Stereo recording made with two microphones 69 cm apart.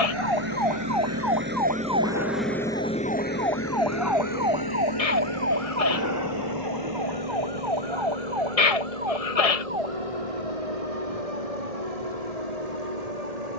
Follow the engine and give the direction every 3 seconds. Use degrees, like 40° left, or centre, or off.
10° right, 30° left, 50° left, 60° left, 70° left.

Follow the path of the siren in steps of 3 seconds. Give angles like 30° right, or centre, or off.
30° left, 10° right, 30° right, 50° right, 50° right.